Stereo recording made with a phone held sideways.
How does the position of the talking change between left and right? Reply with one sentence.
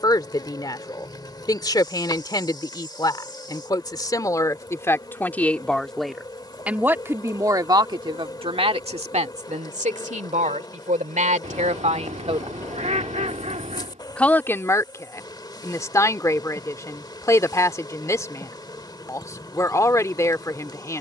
In this clip you hear the talking move from left to right and back again.